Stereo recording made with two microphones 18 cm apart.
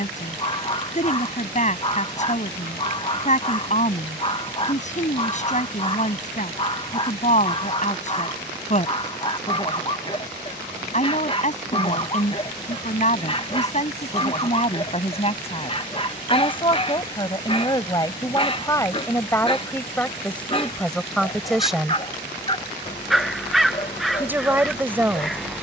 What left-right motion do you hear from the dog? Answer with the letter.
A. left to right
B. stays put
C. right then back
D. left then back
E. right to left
B.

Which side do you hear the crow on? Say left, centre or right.
centre.